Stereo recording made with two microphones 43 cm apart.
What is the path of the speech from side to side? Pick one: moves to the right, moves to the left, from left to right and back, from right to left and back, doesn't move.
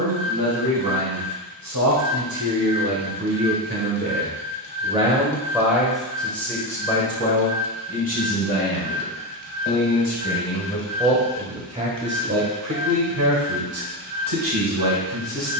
from right to left and back.